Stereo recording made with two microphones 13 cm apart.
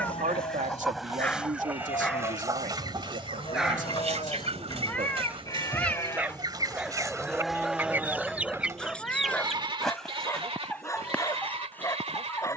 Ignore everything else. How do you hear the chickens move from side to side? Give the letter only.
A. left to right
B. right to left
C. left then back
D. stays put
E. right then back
E.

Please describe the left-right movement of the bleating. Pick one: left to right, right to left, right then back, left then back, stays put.
left to right.